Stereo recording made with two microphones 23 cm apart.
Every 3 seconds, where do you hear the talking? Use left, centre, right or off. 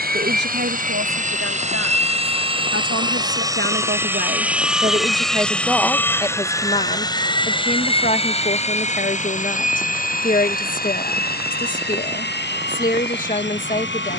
right, right, left, left, left.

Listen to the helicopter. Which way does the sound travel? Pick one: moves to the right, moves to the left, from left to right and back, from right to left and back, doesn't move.
moves to the left.